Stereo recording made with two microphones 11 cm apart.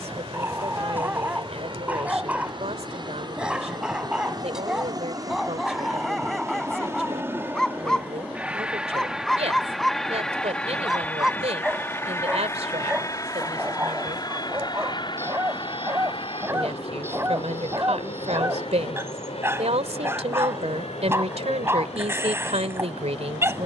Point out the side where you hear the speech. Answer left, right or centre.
right.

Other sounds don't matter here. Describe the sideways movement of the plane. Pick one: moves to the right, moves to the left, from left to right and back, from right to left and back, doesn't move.
moves to the left.